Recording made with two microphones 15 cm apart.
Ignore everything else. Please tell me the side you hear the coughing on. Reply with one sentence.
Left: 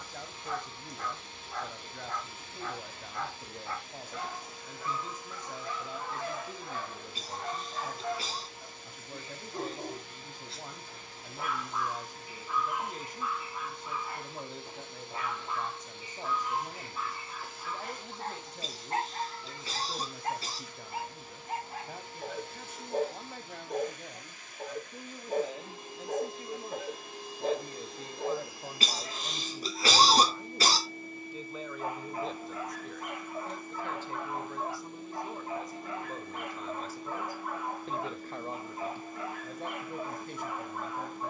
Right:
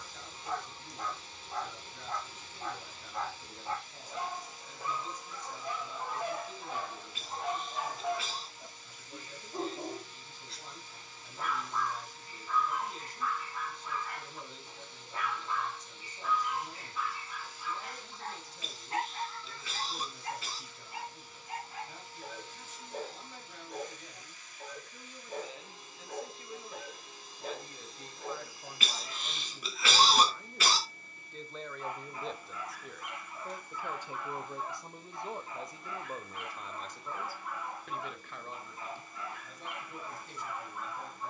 You can hear the coughing on the left.